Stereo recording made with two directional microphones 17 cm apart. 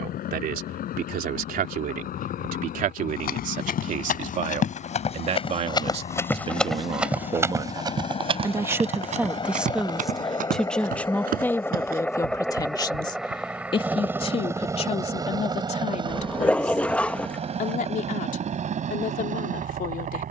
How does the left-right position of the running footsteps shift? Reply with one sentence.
In this clip you hear the running footsteps go from the left side to the right.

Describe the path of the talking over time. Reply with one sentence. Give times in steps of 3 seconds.
In this clip you hear the talking on the right from 0 s, in the centre from 9 s and on the left from 12 s.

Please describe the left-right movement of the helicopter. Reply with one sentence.
You can hear the helicopter travel towards the right.